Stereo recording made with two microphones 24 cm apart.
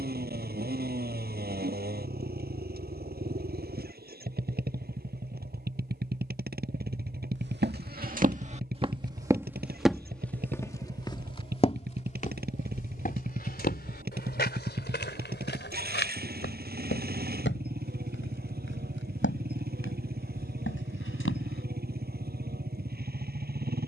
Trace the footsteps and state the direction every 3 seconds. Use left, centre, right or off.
off, off, right, centre, left, left, left, left.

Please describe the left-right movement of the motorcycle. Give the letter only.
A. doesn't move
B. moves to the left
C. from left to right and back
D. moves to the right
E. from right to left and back
A.